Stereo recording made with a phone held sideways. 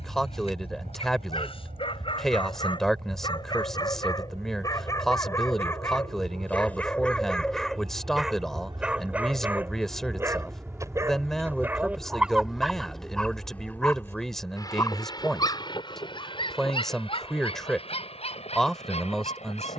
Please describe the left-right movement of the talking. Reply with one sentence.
In this clip you hear the talking stay put.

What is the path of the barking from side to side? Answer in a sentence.
You can hear the barking move from left to right and back again.